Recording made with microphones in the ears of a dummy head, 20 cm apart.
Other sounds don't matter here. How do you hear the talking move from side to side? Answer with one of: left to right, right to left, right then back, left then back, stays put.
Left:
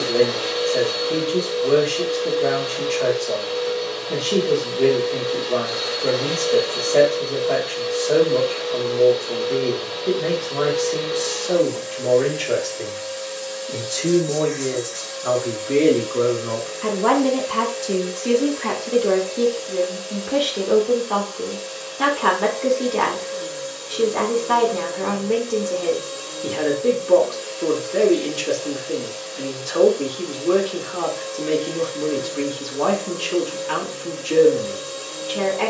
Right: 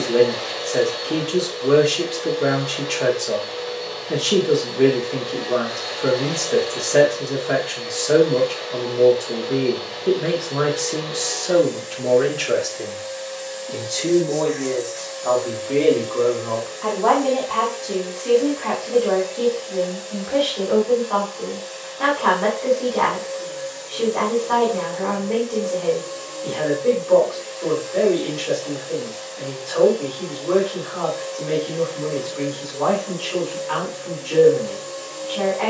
right to left.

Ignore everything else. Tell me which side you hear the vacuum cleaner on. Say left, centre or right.
left.